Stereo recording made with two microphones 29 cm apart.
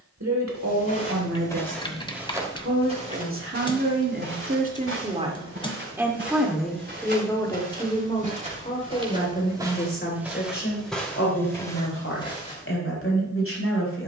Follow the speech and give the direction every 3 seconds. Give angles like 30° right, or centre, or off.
60° right, 30° right, 10° left, 40° left, 50° left.